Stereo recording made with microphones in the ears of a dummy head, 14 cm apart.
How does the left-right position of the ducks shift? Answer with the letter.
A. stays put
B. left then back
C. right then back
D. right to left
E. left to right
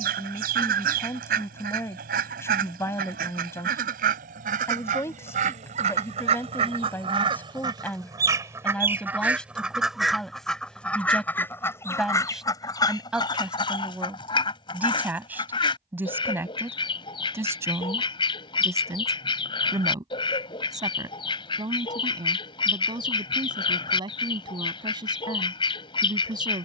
D.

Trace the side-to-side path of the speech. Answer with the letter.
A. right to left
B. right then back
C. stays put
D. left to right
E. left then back
D.